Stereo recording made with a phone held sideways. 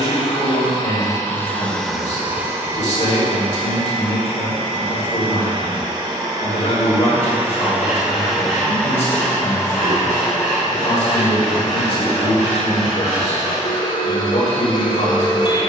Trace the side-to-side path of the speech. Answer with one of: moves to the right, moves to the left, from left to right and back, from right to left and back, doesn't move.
doesn't move.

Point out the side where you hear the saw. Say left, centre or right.
centre.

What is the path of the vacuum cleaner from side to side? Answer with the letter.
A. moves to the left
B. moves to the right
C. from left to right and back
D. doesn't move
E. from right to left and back
C.